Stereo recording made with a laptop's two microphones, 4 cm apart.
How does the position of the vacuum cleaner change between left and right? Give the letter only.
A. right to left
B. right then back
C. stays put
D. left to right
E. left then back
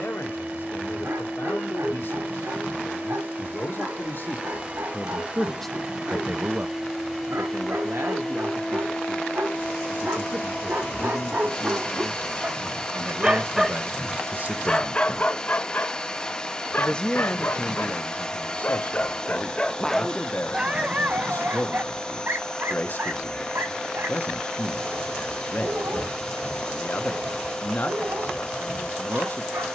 A.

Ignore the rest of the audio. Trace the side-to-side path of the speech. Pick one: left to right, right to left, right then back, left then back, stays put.
right then back.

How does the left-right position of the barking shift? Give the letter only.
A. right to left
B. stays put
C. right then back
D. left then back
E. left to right
D.